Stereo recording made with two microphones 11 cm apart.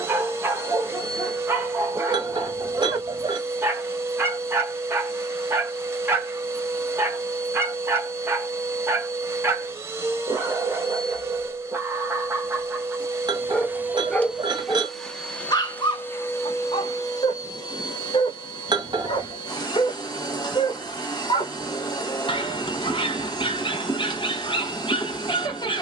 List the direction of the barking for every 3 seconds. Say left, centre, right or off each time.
right, right, right, right, centre, left, left, left, left.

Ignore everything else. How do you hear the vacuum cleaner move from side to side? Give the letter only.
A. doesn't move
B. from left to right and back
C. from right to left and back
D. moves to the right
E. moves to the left
E.